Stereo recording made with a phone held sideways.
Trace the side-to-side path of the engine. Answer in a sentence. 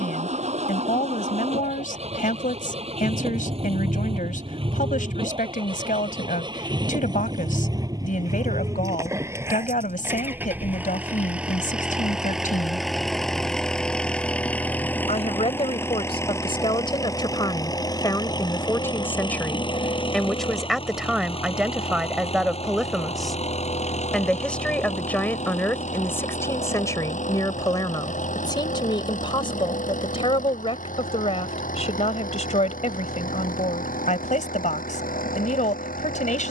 You can hear the engine move to the left.